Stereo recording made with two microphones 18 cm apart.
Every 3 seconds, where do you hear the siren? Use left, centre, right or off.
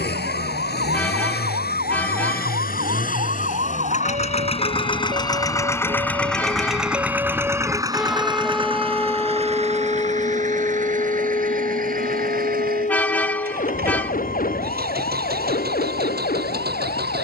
right, right, centre, left, left, left.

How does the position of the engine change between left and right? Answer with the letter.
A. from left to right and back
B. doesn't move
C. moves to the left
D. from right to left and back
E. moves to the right
E.